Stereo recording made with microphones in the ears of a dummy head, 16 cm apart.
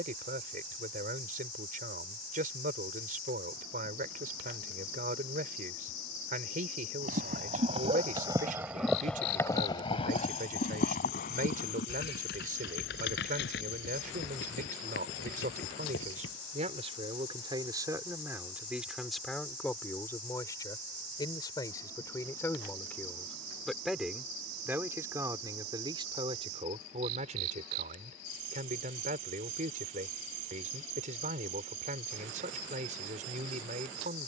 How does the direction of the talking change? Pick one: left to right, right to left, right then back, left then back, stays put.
left then back.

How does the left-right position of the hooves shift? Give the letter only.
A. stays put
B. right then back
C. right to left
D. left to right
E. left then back
C.